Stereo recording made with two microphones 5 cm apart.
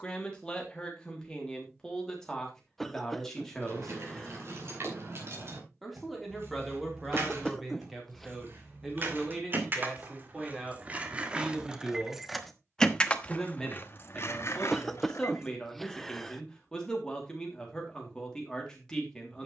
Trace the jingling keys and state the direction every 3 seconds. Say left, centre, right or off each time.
off, right, right, right, left, left, off.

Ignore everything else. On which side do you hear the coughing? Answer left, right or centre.
centre.